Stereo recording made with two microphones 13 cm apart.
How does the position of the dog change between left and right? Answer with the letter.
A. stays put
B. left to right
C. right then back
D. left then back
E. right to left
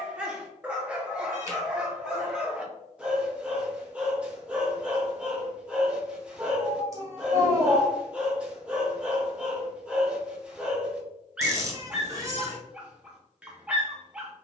A.